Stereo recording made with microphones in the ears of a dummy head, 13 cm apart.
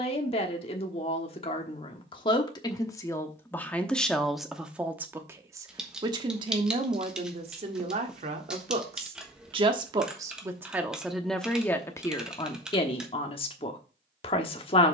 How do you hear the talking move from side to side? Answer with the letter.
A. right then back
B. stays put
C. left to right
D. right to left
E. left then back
A.